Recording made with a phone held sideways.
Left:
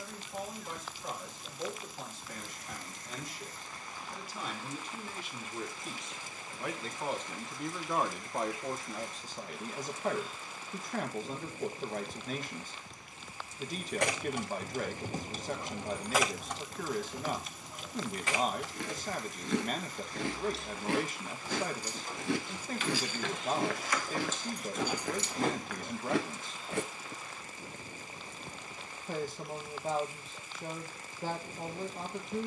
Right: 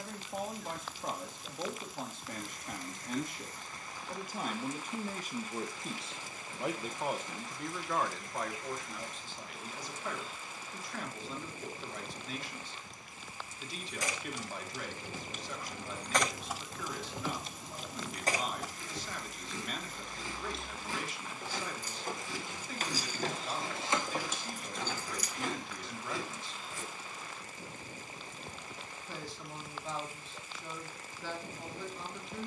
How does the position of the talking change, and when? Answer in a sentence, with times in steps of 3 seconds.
You can hear the talking on the right from 0 s, in the centre from 6 s and on the left from 9 s.